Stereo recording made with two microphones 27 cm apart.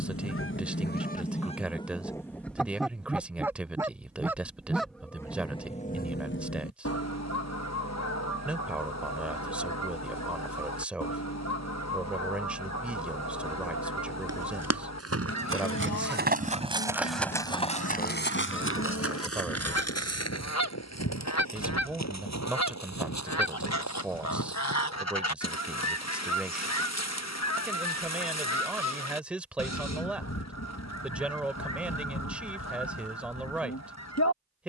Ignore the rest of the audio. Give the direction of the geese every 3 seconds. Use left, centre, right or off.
left, centre, left, left, left, left, left, left, left, left, left, left.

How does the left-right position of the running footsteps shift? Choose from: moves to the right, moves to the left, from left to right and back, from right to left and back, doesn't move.
moves to the left.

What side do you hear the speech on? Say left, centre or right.
centre.